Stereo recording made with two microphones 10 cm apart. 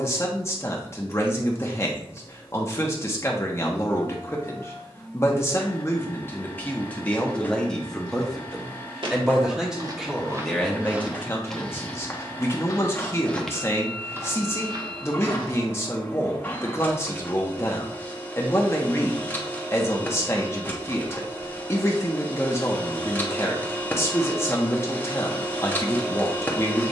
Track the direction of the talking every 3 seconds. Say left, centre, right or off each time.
left, left, centre, centre, left, left, left, left, left.